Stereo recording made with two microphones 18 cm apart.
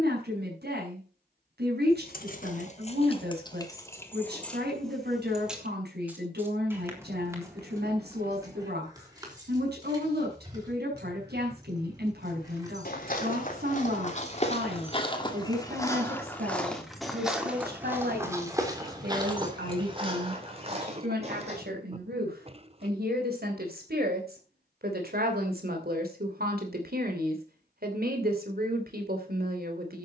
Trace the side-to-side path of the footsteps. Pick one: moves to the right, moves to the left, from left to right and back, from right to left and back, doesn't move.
moves to the right.